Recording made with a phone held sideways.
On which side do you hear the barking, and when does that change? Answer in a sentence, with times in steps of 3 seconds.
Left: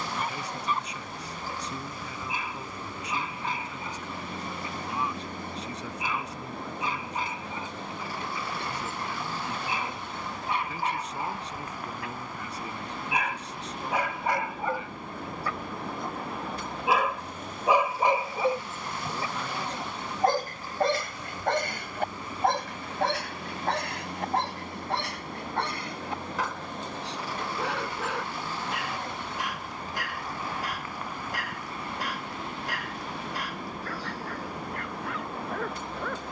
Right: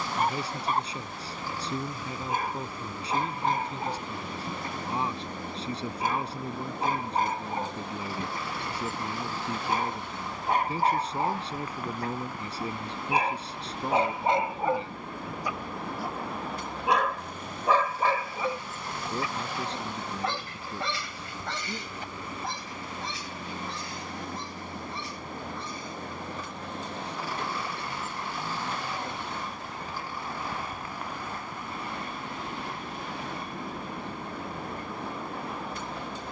You can hear the barking on the right from 0 s, in the centre from 15 s and on the left from 18 s.